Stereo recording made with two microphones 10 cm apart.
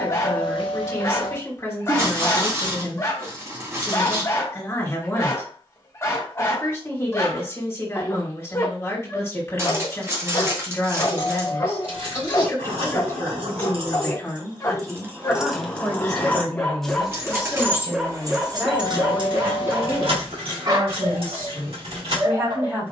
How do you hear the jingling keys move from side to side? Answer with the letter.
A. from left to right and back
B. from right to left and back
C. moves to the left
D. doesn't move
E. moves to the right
B.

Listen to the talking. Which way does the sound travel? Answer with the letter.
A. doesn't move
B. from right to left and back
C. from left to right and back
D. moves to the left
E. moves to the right
E.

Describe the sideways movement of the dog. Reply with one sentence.
You can hear the dog move to the right.